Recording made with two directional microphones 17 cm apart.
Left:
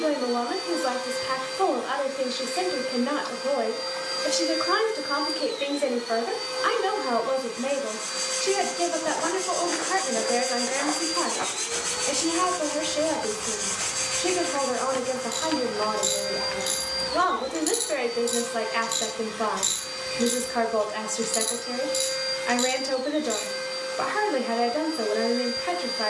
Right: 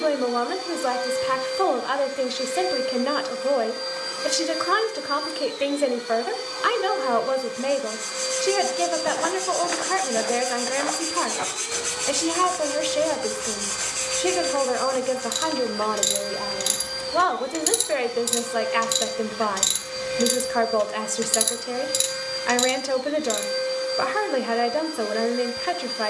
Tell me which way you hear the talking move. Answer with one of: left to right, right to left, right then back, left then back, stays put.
stays put.